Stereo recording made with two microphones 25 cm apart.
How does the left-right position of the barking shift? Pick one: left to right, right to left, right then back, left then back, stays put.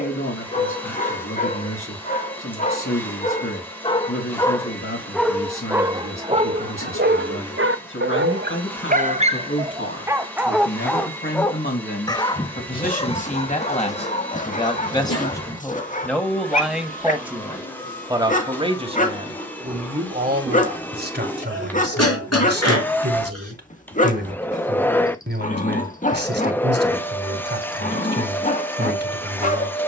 right then back.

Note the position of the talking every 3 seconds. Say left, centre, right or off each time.
left, left, left, left, left, centre, right, right, right, right.